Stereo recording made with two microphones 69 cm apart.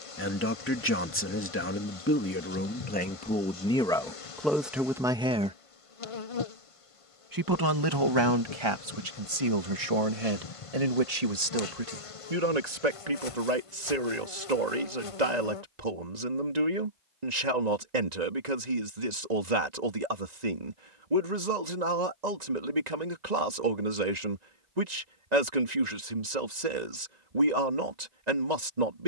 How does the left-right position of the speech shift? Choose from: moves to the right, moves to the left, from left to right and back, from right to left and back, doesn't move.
moves to the right.